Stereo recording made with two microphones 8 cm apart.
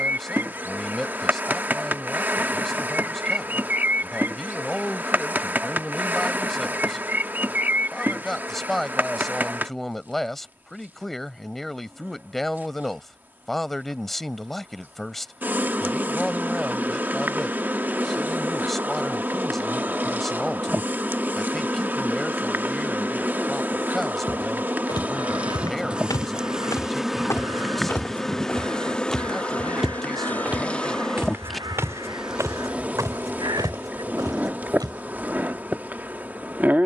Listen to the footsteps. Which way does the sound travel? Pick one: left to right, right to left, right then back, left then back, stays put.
left to right.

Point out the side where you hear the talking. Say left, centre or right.
centre.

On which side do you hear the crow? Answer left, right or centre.
right.